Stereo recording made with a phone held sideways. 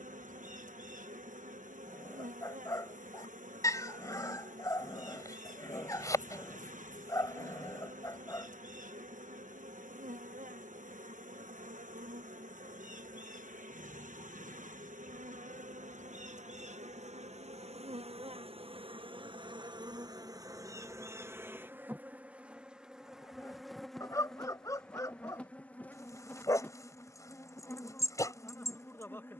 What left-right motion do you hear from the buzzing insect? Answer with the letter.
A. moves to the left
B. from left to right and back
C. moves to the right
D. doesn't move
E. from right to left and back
A.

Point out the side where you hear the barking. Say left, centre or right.
left.